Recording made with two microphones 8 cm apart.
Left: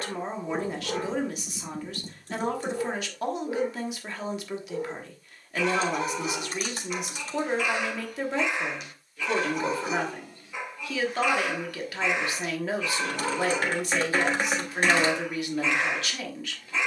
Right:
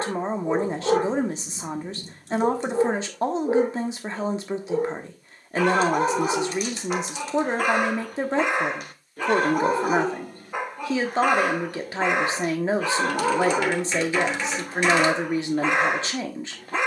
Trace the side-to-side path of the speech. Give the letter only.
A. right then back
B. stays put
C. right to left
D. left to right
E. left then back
B.